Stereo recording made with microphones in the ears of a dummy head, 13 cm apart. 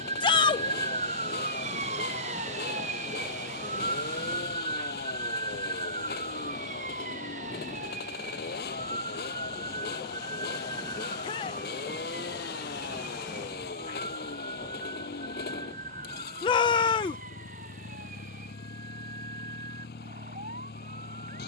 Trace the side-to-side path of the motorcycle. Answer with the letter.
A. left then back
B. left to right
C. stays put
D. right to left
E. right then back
C.